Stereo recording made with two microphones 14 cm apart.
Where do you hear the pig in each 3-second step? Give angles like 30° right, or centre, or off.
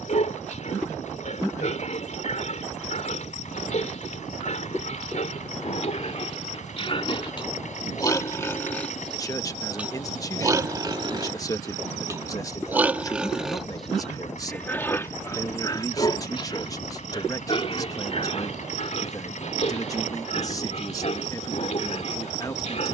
60° left, 60° left, 30° left, 20° right, centre, 30° left, 50° left, 50° left.